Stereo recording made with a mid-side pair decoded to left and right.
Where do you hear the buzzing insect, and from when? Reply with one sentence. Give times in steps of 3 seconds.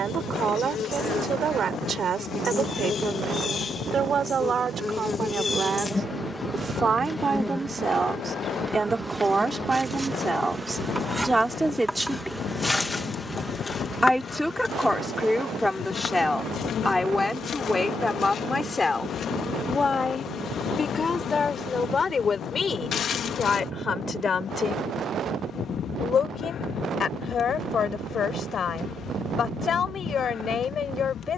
You can hear the buzzing insect on the left from 0 s, in the centre from 6 s and on the left from 12 s.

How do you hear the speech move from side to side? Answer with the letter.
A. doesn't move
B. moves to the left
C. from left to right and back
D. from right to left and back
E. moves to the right
B.